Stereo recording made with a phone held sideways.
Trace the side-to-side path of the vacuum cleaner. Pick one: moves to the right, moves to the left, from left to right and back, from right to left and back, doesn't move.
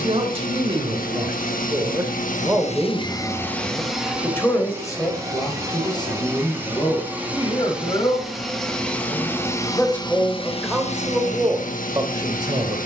from left to right and back.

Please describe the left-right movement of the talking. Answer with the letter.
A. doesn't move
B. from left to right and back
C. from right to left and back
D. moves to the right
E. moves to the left
C.